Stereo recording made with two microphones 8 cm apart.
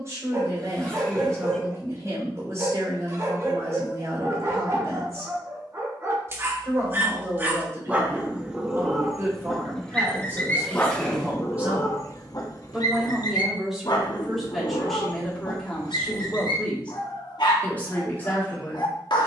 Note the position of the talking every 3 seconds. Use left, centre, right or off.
right, right, right, right, centre, centre, left.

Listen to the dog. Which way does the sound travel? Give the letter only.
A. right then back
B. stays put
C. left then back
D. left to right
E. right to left
E.